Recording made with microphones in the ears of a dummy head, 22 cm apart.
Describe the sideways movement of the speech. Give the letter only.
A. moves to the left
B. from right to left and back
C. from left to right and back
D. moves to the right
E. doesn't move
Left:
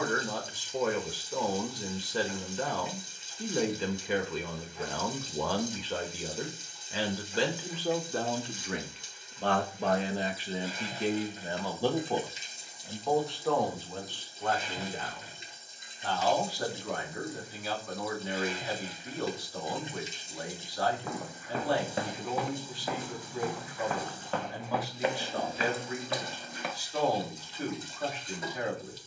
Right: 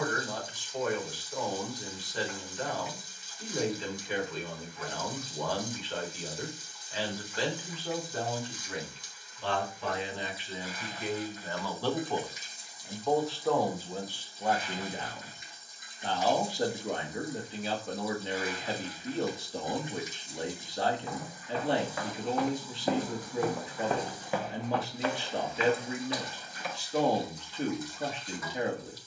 D.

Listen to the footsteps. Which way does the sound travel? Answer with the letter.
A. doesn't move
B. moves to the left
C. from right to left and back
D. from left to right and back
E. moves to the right
D.